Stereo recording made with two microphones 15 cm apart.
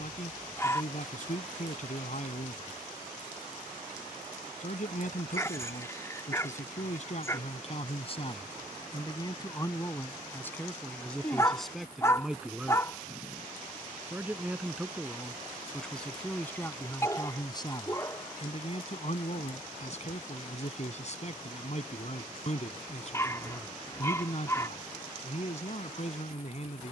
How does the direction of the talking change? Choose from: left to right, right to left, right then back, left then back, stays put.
right then back.